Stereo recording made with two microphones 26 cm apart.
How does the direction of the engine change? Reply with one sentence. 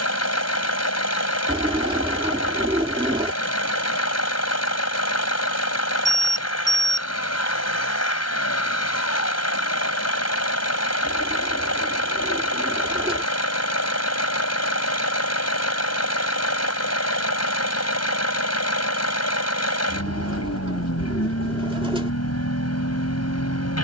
You can hear the engine stay in one place.